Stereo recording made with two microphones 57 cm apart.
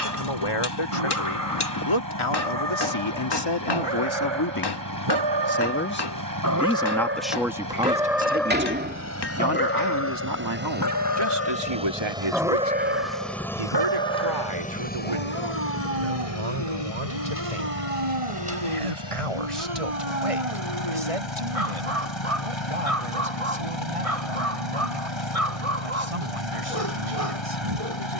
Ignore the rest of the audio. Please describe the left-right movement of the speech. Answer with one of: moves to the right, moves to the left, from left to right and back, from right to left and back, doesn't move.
moves to the right.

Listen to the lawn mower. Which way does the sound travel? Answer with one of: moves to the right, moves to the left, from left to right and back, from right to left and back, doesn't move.
moves to the left.